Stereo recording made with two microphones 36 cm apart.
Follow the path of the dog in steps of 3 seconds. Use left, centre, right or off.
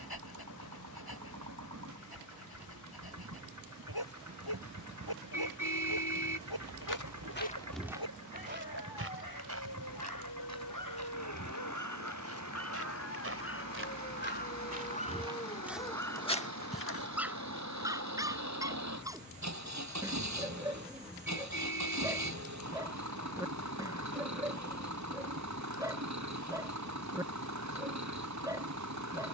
left, left, left, left, left, centre, centre, centre, centre, centre.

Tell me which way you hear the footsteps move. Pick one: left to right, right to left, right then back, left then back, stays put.
right then back.